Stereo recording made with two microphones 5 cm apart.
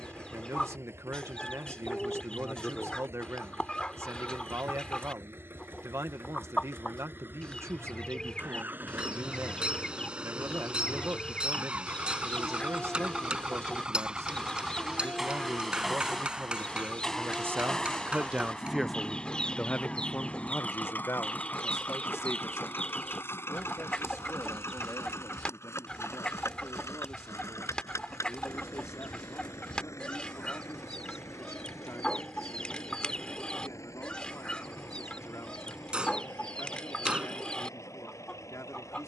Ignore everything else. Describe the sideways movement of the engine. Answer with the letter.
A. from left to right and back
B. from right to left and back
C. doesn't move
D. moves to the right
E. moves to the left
E.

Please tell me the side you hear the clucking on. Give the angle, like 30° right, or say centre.
20° left.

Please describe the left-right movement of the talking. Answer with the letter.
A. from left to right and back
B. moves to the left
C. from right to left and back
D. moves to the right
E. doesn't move
B.